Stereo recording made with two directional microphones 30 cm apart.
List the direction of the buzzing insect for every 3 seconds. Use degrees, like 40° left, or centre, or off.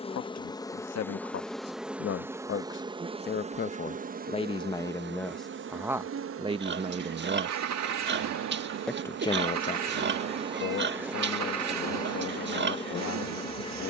centre, 30° right, 50° right, 20° right, 20° left.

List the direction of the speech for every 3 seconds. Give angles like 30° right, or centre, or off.
50° left, 10° left, 20° right, 40° left, 60° left.